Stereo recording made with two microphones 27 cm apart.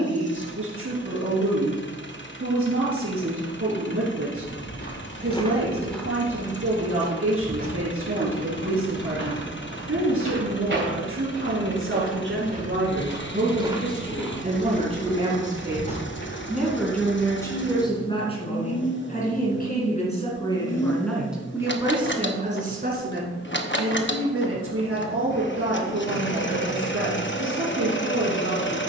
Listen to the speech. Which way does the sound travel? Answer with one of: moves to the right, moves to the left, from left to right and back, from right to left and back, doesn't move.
from right to left and back.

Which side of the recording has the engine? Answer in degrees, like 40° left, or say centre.
40° left.